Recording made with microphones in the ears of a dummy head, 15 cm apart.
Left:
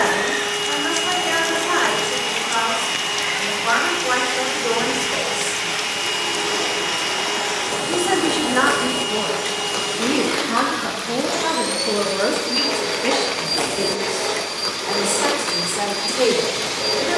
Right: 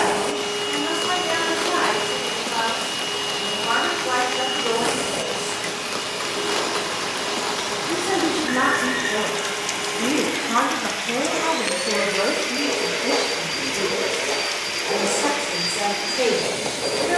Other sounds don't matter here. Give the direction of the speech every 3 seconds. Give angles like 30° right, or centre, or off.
80° left, 80° left, 40° left, centre, 50° left, 80° left.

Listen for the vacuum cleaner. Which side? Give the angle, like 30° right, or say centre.
60° left.